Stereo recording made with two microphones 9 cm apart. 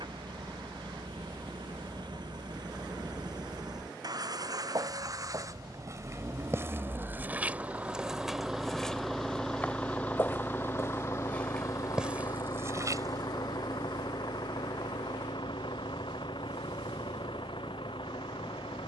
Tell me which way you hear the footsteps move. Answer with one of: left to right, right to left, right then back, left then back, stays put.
left then back.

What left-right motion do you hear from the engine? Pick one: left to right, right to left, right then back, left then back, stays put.
right to left.